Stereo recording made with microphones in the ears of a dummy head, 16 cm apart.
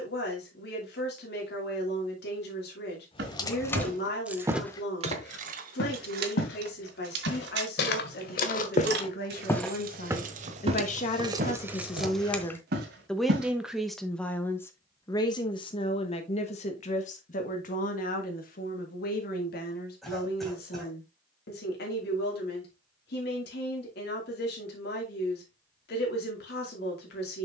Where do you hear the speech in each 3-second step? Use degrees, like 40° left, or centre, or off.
60° left, 60° left, 60° left, 50° left, 10° left, 40° left, 60° left, 60° left, 60° left.